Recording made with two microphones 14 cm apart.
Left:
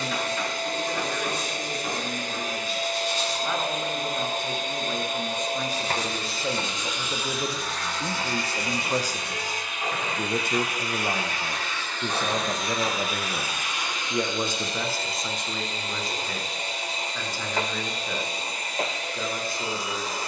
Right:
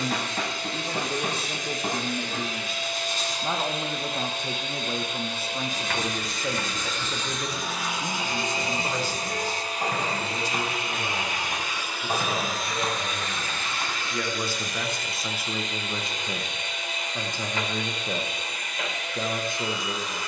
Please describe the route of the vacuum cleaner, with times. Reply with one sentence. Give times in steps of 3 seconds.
In this clip you hear the vacuum cleaner on the left from 0 s, in the centre from 6 s, on the right from 9 s, in the centre from 12 s and on the left from 15 s.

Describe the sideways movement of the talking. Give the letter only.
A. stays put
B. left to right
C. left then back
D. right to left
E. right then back
C.